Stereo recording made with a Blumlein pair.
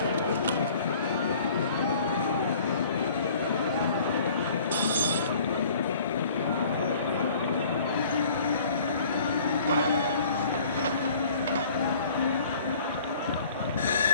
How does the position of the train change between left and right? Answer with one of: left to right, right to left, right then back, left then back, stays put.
stays put.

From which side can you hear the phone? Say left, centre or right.
right.